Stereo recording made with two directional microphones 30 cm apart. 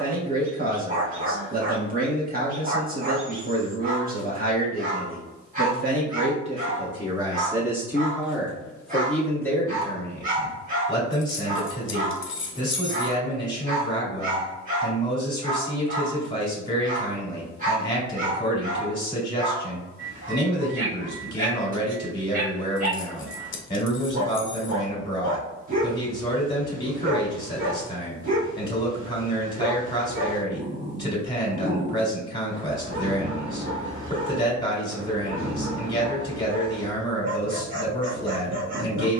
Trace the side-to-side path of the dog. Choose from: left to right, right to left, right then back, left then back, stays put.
stays put.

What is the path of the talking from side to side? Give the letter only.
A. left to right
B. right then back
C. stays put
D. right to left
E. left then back
D.